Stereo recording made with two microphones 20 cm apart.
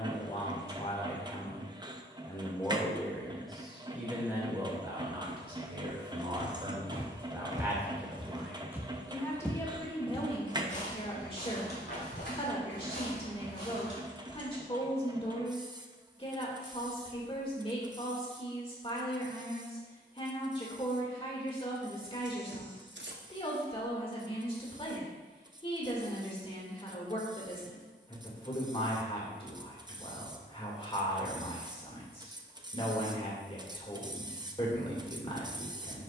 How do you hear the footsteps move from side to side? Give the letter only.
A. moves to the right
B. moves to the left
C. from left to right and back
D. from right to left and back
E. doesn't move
B.